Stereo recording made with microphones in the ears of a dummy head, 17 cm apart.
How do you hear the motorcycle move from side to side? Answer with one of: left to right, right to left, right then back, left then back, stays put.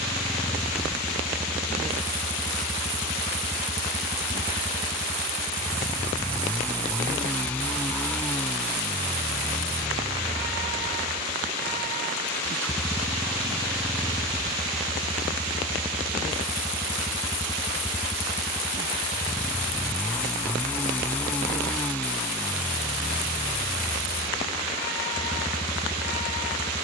stays put.